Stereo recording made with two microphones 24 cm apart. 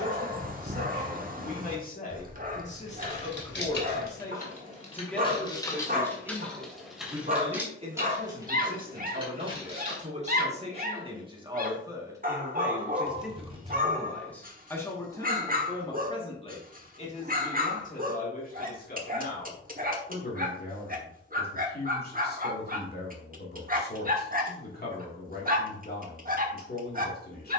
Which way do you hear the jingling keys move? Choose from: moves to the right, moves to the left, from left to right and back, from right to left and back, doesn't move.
moves to the right.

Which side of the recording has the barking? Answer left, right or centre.
right.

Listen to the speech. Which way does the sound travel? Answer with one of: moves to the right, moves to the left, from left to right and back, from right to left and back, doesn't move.
from left to right and back.